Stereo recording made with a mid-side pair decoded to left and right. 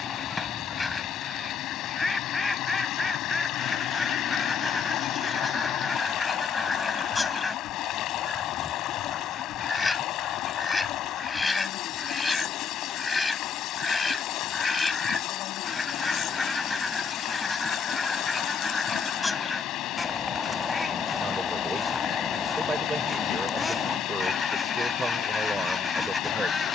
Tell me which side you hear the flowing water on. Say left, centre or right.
left.